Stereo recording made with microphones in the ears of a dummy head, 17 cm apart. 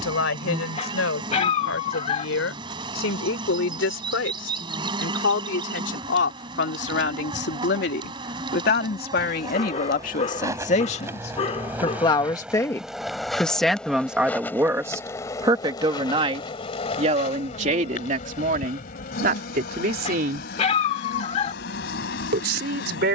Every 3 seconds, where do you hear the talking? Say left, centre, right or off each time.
left, left, left, left, centre, right, right, right.